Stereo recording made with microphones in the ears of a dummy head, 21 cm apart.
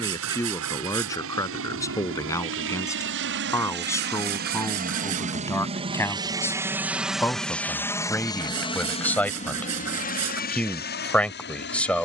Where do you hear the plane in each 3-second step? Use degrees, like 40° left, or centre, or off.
70° right, 40° right, centre, 40° left.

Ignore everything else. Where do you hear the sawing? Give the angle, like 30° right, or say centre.
70° right.